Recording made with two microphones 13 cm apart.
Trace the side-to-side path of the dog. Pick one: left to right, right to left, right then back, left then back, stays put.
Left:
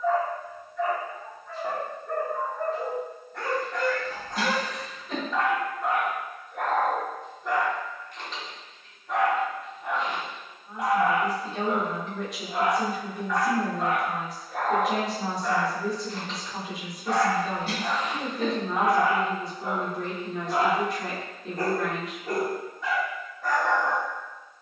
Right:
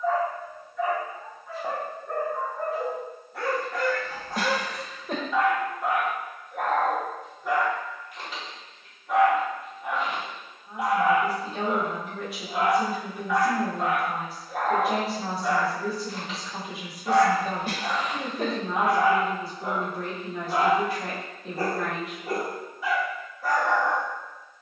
stays put.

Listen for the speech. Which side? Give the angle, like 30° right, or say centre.
centre.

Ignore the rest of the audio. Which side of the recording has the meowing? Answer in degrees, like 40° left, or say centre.
50° right.